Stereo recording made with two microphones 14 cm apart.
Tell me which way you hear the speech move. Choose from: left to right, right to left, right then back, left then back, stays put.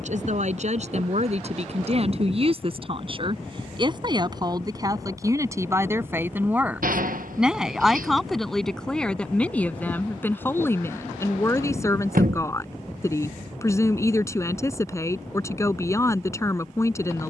right to left.